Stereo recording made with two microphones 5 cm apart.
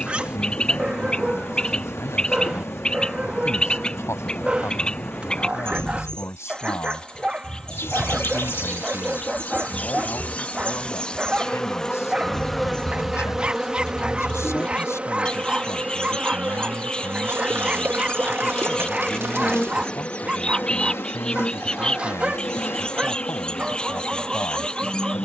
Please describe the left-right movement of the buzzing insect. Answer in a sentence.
You can hear the buzzing insect go right and come back.